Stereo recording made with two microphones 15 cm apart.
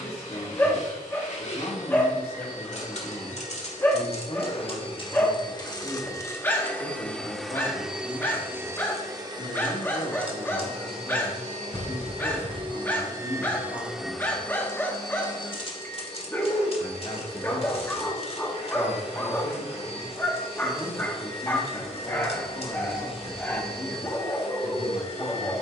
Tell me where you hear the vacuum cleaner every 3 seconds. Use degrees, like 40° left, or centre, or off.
50° left, 40° left, centre, 40° right, 10° right, 40° left, 40° left, 40° left, 40° left.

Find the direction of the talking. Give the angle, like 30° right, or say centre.
40° left.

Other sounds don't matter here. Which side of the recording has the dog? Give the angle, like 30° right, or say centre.
10° left.